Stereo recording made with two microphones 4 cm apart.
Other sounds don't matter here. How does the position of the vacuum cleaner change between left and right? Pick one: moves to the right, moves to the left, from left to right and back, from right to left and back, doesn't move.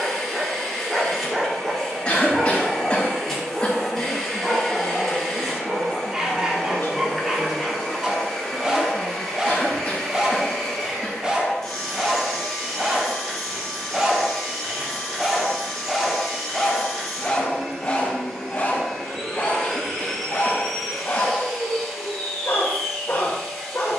doesn't move.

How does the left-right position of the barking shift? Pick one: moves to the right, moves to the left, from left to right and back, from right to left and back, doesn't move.
moves to the left.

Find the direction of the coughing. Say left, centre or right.
left.